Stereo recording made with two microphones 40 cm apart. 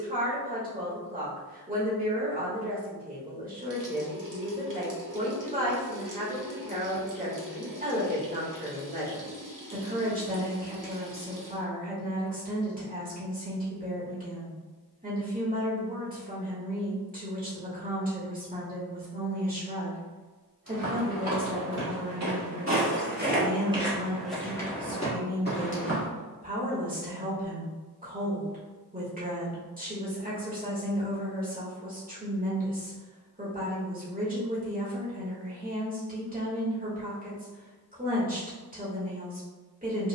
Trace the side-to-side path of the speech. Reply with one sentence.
You can hear the speech stay put.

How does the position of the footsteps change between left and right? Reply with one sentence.
You can hear the footsteps go from the right side to the left.